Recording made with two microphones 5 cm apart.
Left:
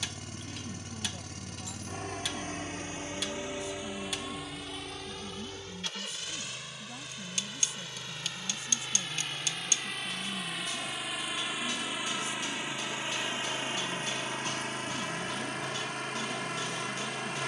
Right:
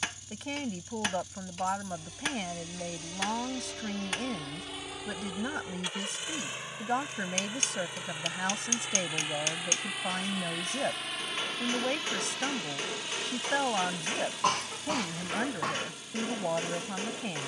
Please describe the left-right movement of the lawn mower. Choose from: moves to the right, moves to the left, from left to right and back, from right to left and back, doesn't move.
from left to right and back.